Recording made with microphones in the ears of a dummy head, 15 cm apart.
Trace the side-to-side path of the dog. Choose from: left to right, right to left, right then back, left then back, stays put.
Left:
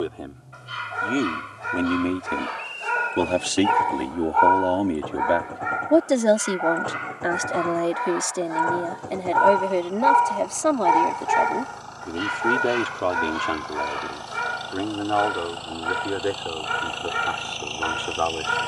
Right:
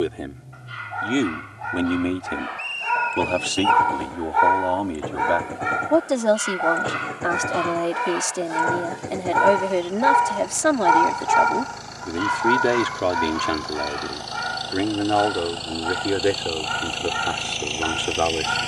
right then back.